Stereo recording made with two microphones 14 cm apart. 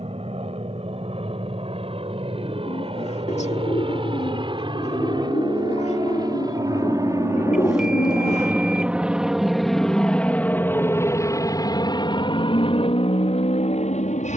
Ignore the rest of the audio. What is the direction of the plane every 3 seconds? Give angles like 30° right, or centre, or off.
50° right, 40° right, 20° right, 10° left, 40° left.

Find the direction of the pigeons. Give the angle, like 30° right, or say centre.
50° left.